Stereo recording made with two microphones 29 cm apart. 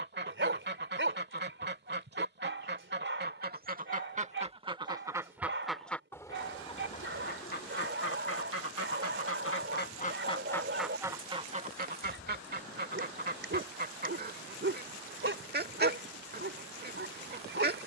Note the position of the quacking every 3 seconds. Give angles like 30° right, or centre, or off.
40° right, 20° right, 30° left, 10° left, 30° right, 30° right.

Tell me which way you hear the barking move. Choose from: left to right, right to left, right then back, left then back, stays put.
stays put.